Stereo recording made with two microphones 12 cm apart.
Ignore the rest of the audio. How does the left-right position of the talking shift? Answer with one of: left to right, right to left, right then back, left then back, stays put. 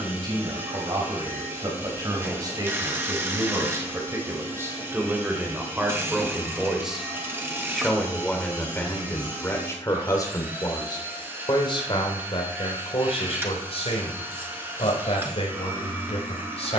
right to left.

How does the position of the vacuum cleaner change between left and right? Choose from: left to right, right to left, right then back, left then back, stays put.
stays put.